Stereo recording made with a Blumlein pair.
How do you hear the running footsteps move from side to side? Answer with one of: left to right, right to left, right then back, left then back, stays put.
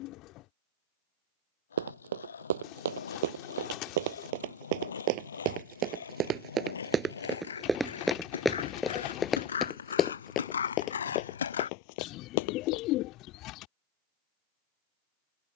right to left.